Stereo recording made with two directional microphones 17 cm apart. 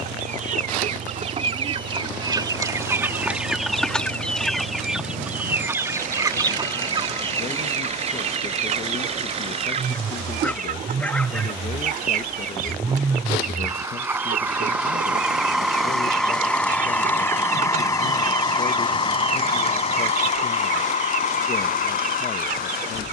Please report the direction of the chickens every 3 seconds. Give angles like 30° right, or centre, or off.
30° right, centre, 30° right, 50° right, 60° right, 60° right, 60° right, 60° right.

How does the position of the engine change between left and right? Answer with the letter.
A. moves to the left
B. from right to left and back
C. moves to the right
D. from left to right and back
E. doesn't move
A.